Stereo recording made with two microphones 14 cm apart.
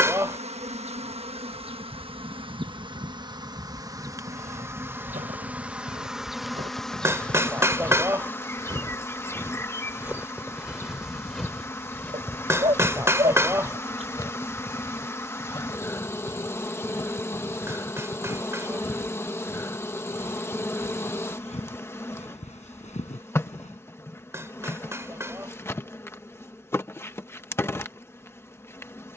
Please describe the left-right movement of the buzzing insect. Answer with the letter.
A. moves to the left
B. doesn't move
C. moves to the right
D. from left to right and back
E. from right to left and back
A.